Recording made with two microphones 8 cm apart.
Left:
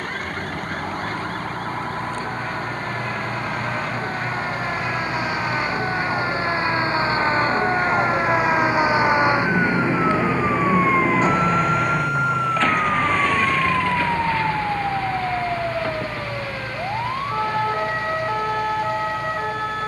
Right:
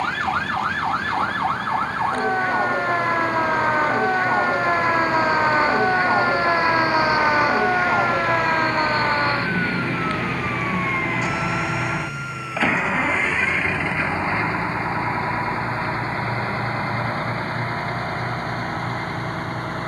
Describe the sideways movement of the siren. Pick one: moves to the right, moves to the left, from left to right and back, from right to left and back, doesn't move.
moves to the left.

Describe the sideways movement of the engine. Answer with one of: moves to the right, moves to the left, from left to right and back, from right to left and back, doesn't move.
moves to the right.